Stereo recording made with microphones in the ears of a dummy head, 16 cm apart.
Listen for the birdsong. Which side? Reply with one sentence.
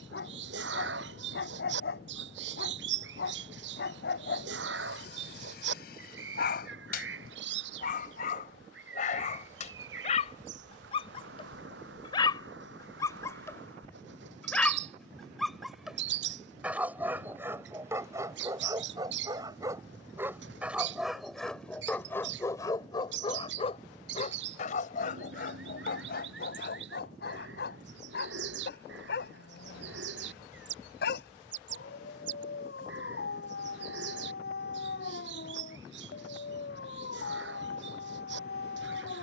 You can hear the birdsong on the right.